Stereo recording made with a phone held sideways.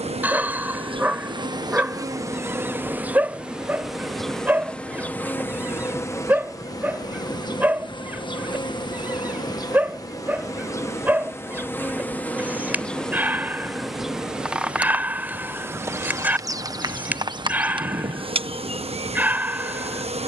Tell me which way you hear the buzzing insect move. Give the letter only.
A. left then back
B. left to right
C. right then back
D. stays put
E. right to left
A.